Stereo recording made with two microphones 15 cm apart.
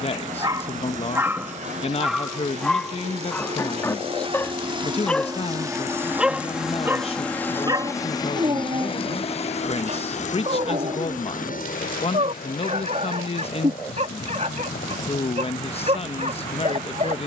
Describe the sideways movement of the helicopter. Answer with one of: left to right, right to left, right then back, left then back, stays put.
right to left.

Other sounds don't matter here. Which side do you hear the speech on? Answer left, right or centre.
left.